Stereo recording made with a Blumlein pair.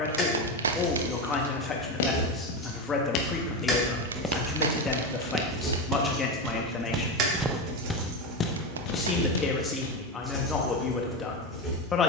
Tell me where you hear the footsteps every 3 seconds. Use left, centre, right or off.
left, centre, centre, left.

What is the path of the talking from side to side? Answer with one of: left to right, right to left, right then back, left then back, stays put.
stays put.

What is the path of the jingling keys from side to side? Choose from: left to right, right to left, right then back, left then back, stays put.
right then back.